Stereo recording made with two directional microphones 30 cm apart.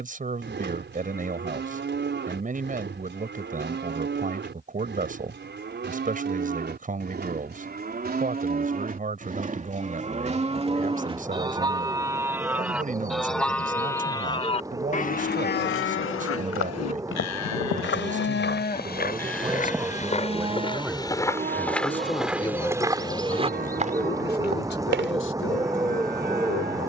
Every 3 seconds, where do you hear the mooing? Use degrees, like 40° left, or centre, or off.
40° right, 40° right, 30° right, 20° right, centre, 50° left, 10° left, 30° right, 30° right.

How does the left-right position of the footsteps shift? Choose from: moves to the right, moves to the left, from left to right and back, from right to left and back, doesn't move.
moves to the right.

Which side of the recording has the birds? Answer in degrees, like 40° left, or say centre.
10° right.